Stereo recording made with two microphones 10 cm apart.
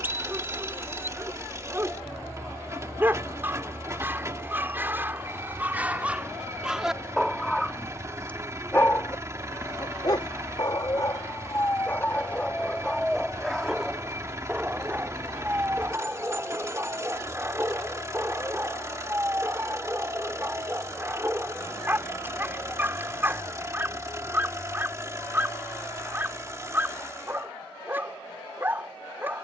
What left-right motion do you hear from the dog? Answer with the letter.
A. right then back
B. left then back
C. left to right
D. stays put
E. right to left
B.